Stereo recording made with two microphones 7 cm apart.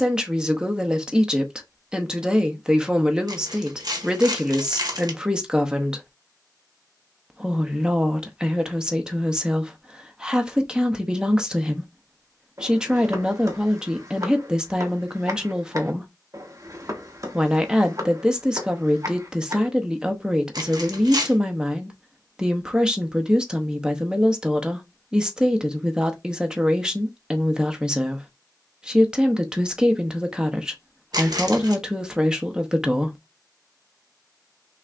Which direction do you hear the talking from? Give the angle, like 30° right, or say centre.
10° right.